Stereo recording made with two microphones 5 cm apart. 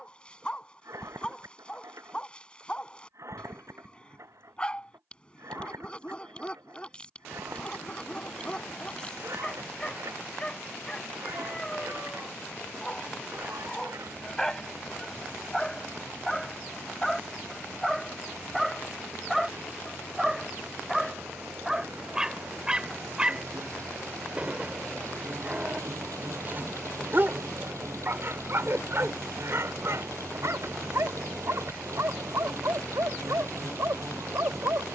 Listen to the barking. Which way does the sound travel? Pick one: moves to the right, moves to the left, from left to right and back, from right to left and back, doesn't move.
moves to the right.